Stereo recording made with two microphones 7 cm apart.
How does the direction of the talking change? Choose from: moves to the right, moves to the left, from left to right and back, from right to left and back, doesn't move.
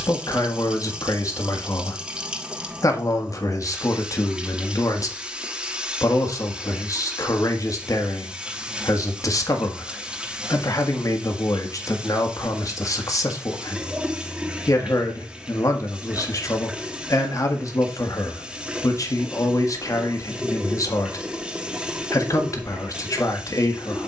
doesn't move.